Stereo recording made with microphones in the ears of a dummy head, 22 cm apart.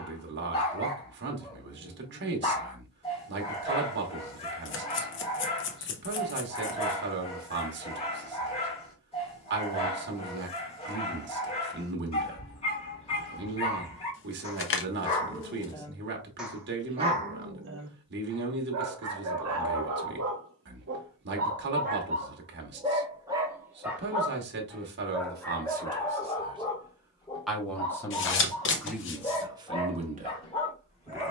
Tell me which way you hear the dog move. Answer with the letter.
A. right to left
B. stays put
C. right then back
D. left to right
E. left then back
C.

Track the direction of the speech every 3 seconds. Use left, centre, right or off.
right, right, right, right, right, right, right, right, right, centre, right.